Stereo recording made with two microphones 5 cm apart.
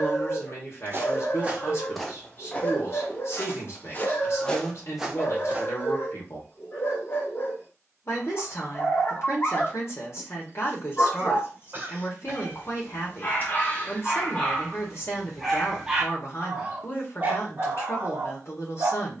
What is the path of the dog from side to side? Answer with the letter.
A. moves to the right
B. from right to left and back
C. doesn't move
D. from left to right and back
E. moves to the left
A.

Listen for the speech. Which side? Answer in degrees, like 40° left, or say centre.
50° left.